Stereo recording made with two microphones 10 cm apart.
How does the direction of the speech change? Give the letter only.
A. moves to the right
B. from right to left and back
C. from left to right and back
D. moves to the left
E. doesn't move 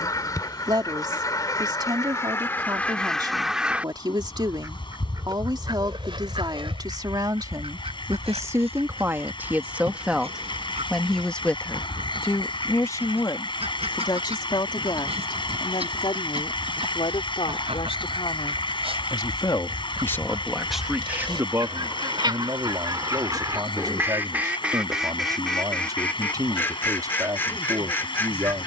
B.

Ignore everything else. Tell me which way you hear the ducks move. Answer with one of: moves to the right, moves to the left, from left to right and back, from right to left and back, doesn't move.
from left to right and back.